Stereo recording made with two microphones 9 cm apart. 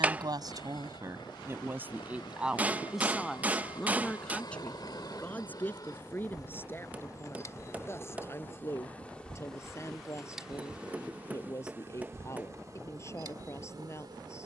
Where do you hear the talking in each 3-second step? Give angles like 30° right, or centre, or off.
30° right, 10° left, 30° left, 30° left, 30° left.